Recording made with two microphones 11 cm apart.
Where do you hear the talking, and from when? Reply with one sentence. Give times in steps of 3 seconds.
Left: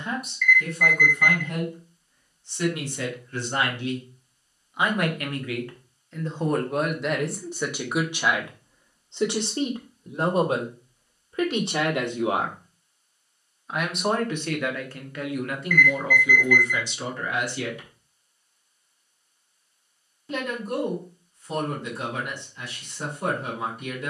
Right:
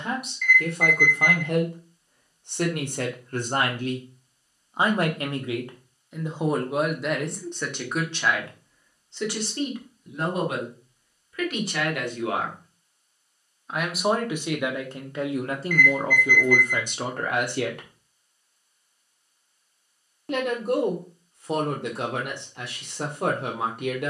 You can hear the talking on the right from 0 s, in the centre from 6 s, on the left from 9 s, in the centre from 12 s and on the right from 15 s.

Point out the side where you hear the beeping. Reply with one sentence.
You can hear the beeping on the right.